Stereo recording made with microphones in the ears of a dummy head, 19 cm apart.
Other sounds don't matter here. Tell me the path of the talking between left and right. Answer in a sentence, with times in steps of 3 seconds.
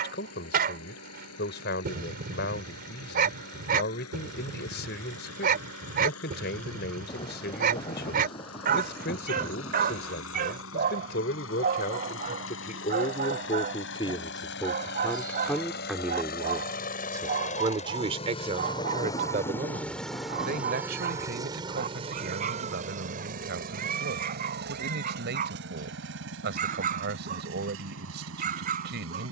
In this clip you hear the talking on the left from 0 s, in the centre from 15 s and on the right from 18 s.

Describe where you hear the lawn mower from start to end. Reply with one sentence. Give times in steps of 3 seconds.
You can hear the lawn mower on the left from 0 s, in the centre from 18 s and on the right from 21 s.